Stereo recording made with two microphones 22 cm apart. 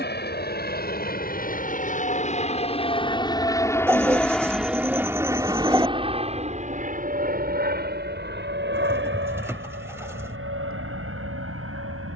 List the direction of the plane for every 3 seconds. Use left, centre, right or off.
left, centre, right, right.